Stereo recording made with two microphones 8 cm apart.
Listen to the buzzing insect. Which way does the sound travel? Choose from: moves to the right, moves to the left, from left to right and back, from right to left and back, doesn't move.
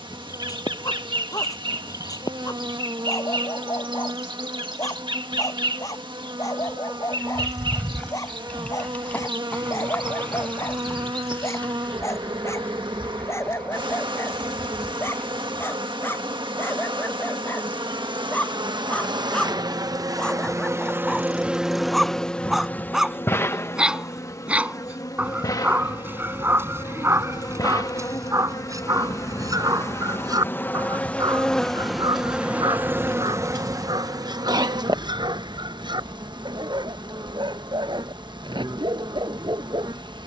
from right to left and back.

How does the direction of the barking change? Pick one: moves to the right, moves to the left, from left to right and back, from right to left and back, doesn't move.
moves to the right.